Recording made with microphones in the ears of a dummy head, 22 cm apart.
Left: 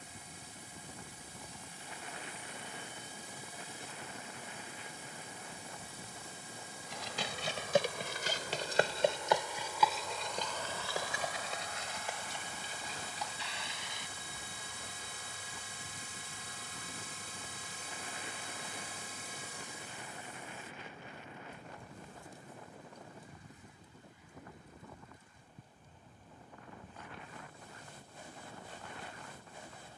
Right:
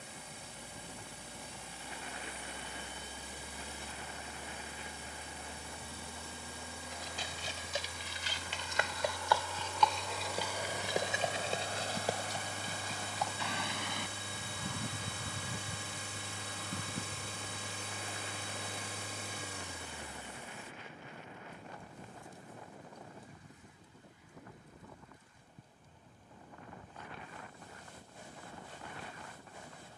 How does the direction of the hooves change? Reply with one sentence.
You can hear the hooves move from left to right.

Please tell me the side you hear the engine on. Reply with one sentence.
In this clip you hear the engine on the right.